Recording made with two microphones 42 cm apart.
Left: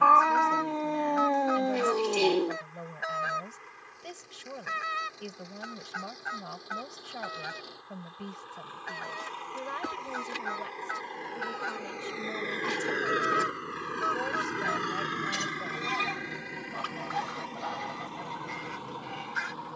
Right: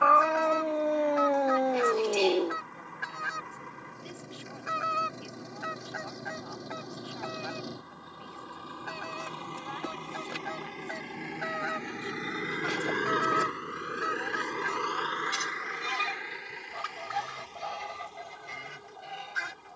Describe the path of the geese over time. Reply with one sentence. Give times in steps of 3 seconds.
In this clip you hear the geese on the right from 0 s, in the centre from 3 s, on the left from 6 s, in the centre from 12 s and on the right from 15 s.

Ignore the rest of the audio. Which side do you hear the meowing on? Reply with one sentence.
In this clip you hear the meowing in the centre.